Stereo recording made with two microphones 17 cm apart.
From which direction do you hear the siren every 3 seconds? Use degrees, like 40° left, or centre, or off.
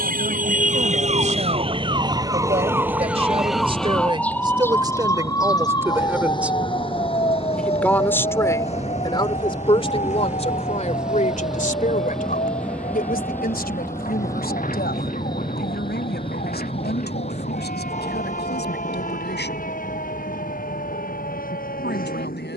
30° right, 10° left, 30° left, 40° left, 50° left, 50° left, 50° left, 50° left.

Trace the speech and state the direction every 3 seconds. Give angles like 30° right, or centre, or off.
40° right, 30° right, centre, 40° left, 60° left, 70° left, 80° left, 80° left.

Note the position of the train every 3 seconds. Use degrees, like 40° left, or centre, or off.
50° right, 40° right, 30° right, 10° right, 10° left, 30° left, 50° left, 50° left.